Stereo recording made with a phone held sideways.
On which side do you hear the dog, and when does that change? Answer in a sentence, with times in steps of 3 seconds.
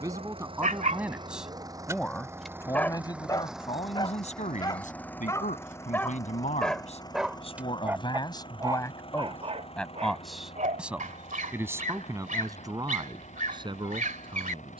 You can hear the dog on the right from 0 s, on the left from 3 s, in the centre from 6 s and on the right from 9 s.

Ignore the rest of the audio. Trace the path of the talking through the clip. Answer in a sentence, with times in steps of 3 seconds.
You can hear the talking in the centre from 0 s, on the left from 3 s, in the centre from 9 s and on the right from 12 s.